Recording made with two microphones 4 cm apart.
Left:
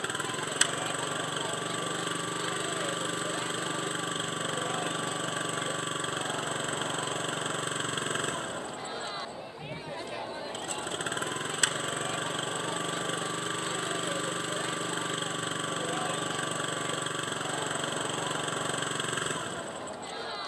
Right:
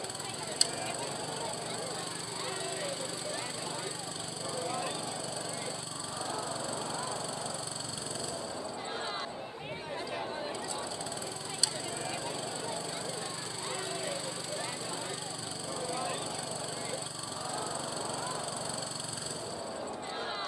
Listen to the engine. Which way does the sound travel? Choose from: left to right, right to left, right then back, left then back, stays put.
stays put.